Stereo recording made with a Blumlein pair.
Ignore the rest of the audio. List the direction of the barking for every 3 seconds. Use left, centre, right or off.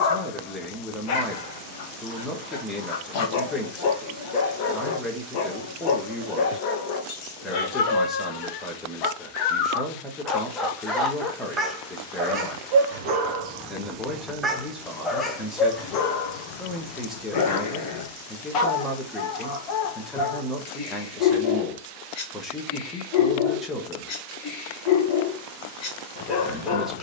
left, left, left, centre, right, left, left, left, left.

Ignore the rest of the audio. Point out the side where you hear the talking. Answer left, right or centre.
centre.